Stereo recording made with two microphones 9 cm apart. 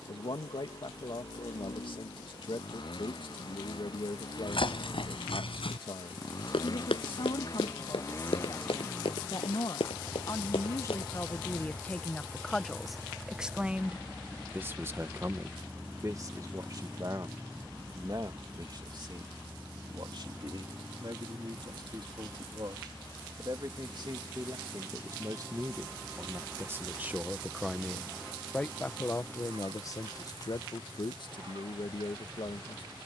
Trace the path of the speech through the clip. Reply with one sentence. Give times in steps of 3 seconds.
In this clip you hear the speech on the left from 0 s, in the centre from 12 s, on the right from 15 s, in the centre from 27 s and on the left from 30 s.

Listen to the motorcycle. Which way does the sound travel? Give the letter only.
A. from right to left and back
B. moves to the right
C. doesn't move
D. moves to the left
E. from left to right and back
B.